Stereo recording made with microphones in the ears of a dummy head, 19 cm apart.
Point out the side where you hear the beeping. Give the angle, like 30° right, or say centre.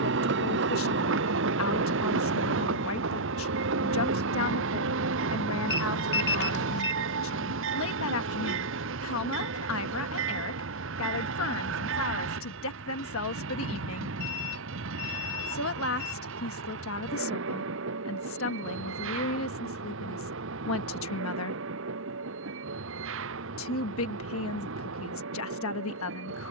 50° left.